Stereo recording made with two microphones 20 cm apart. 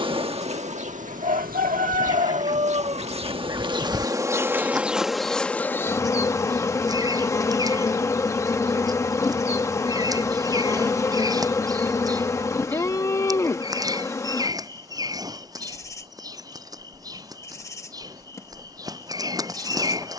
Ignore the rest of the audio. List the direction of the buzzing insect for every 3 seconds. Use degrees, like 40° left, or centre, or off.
40° right, 10° right, 10° left, 10° left, 10° left, 10° left, 10° left.